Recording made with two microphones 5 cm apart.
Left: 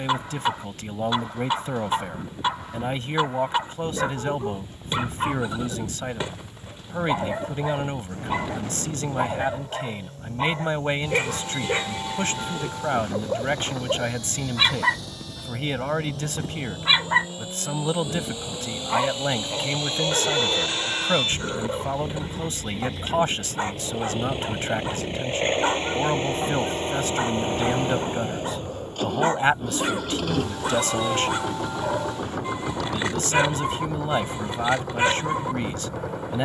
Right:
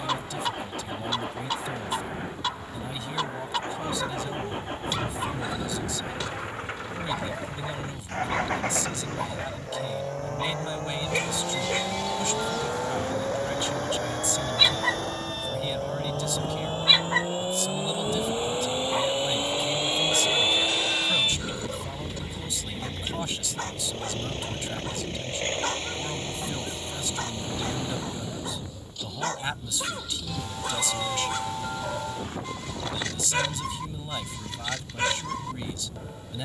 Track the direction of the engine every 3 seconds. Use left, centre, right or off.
right, right, right, right, right, right, right, centre, left, left, left, left.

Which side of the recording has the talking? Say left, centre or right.
left.